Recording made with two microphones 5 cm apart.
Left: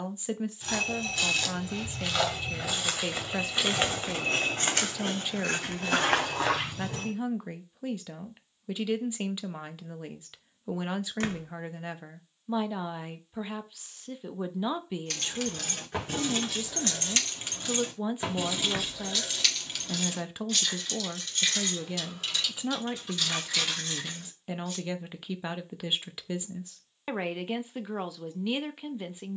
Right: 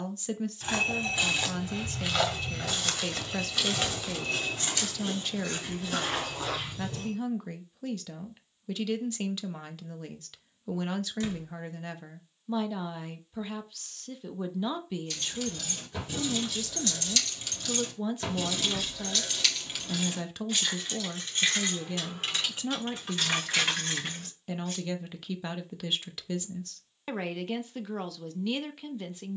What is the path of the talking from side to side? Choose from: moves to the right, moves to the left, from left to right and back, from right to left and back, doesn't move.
doesn't move.